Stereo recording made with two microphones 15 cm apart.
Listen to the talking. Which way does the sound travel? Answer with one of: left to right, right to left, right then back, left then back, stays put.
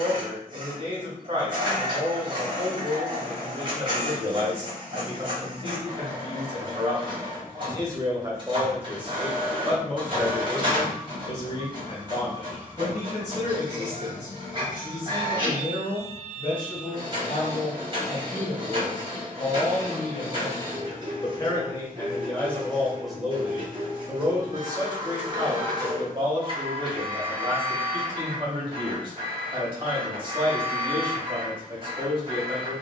left then back.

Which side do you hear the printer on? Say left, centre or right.
right.